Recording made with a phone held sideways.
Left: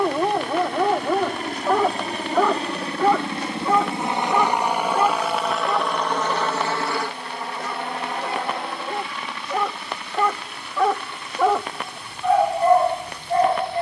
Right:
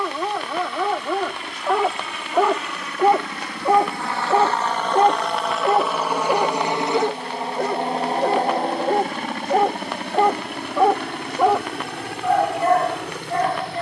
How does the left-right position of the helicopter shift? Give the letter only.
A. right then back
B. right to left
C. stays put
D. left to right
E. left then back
D.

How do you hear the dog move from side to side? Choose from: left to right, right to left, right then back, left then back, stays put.
right then back.